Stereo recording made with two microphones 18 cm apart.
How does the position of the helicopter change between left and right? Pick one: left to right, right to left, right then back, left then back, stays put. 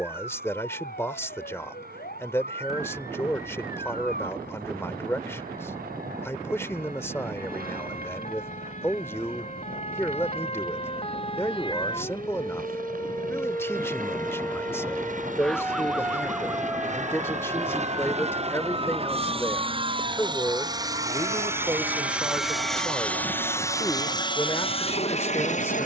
right to left.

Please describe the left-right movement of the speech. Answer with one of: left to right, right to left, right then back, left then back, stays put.
stays put.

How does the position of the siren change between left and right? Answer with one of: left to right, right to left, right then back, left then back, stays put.
left to right.